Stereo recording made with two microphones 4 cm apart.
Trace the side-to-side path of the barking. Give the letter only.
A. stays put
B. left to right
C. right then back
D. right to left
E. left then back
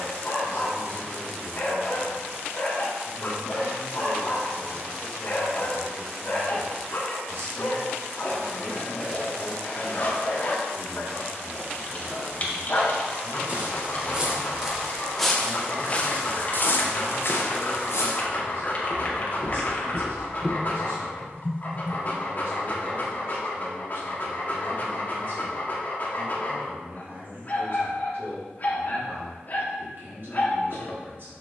A.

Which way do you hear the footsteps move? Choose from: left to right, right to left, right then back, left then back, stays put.
left then back.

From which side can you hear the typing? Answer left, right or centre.
left.